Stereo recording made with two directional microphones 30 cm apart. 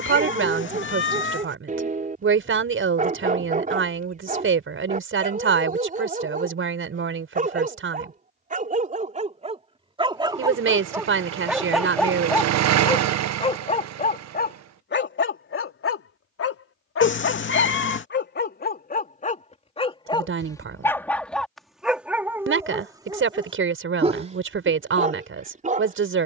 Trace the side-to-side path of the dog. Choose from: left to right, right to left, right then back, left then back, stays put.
left then back.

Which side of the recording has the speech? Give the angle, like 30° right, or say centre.
40° right.